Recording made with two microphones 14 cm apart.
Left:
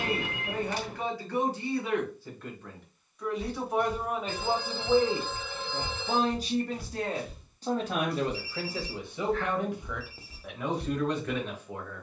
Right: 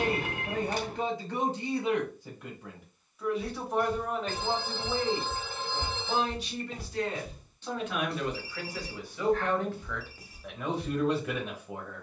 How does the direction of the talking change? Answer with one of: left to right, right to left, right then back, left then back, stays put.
left then back.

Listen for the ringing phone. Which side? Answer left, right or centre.
right.